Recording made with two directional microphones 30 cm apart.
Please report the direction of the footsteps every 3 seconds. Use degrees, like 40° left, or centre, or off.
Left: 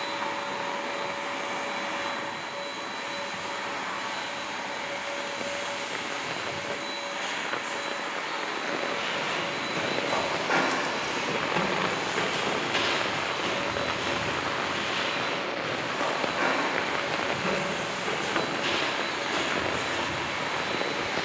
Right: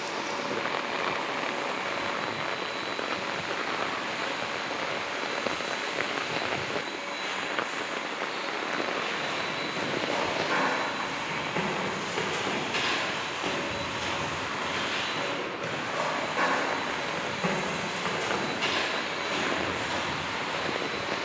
off, off, off, 30° left, 10° right, 50° right, 60° right.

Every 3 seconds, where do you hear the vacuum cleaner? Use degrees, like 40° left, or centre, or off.
70° left, 70° left, 70° left, 50° left, 10° right, 20° right, 40° left.